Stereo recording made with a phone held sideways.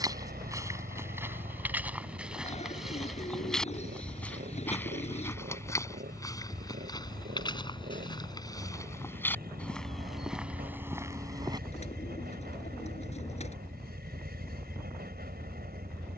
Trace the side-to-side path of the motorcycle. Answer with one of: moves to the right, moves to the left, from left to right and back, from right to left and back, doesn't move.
doesn't move.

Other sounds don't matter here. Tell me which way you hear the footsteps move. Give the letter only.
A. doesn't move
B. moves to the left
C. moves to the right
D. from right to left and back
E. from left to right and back
D.